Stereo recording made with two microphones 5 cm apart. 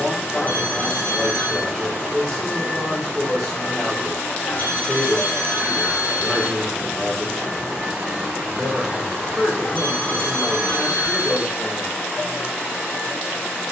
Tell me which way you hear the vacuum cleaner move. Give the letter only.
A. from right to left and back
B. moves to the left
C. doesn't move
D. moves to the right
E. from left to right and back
E.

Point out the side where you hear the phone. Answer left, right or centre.
left.